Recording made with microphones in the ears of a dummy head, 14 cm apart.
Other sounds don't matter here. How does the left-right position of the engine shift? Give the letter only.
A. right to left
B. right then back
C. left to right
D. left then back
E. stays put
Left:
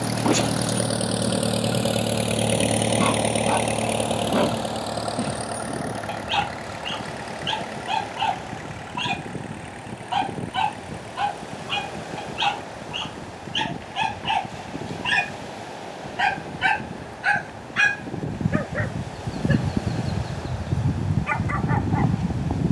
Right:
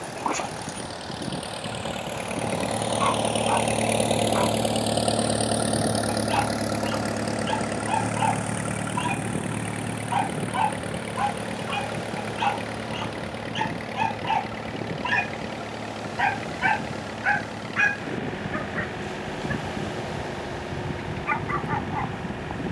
C.